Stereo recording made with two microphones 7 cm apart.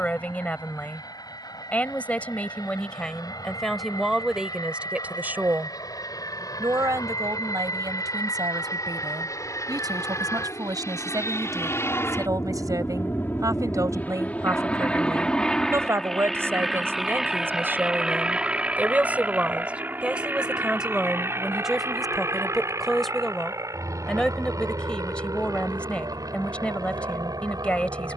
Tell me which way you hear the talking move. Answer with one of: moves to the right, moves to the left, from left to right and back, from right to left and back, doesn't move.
from left to right and back.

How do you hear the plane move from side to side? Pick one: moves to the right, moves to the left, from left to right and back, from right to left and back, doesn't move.
moves to the right.